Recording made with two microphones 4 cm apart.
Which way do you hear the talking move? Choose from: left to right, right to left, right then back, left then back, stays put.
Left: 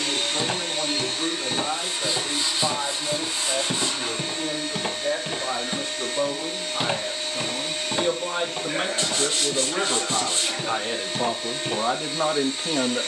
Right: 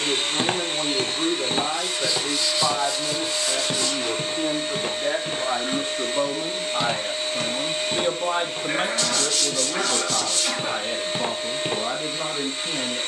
right to left.